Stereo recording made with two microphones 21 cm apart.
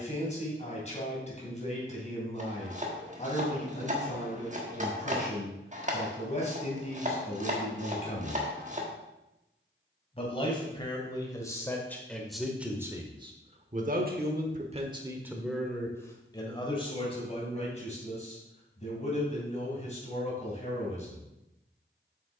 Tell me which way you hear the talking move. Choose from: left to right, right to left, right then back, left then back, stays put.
right then back.